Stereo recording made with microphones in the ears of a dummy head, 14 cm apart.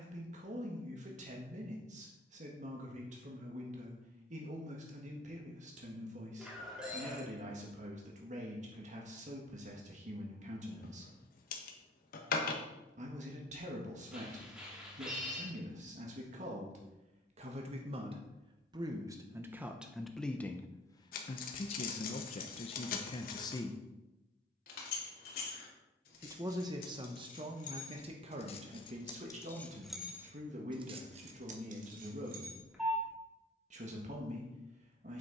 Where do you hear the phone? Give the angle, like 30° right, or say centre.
centre.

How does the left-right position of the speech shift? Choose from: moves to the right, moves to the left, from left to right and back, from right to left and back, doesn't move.
from right to left and back.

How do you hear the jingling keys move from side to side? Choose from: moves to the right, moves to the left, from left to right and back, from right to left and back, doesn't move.
moves to the right.